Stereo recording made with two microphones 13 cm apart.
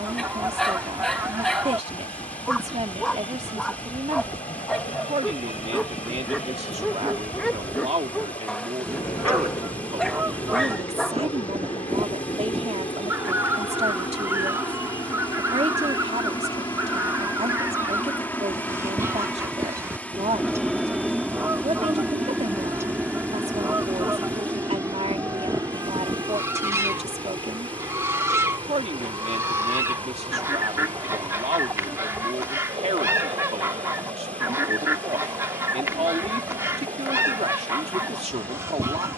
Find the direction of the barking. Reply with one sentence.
In this clip you hear the barking in the centre.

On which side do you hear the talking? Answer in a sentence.
You can hear the talking on the right.